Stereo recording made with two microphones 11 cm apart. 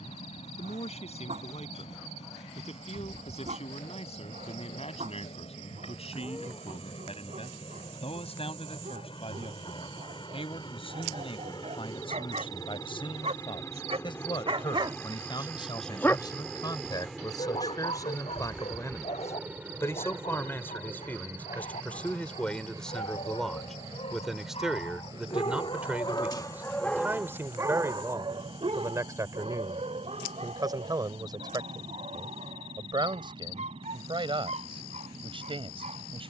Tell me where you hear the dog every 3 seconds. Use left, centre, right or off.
right, right, right, right, right, left, left, left, left, right, right, right.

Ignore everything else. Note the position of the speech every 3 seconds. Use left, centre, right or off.
left, left, left, left, left, left, left, centre, centre, right, right, right.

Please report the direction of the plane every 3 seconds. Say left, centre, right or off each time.
left, left, left, left, left, centre, centre, right, right, right, right, right.